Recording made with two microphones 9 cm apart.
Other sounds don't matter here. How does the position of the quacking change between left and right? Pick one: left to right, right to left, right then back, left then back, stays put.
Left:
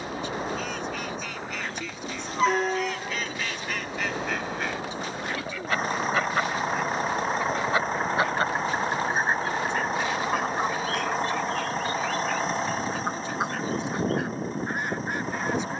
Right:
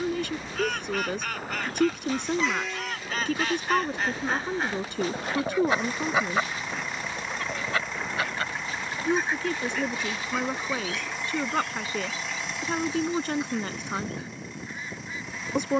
right to left.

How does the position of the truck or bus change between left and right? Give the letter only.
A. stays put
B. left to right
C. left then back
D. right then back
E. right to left
A.